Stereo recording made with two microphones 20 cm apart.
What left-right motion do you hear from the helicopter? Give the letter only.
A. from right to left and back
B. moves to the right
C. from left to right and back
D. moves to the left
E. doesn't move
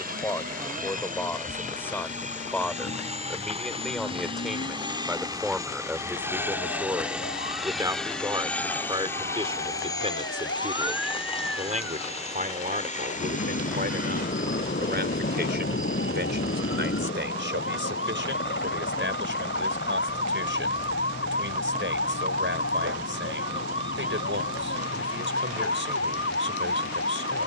D.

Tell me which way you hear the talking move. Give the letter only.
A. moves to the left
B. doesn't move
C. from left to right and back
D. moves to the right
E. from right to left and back
D.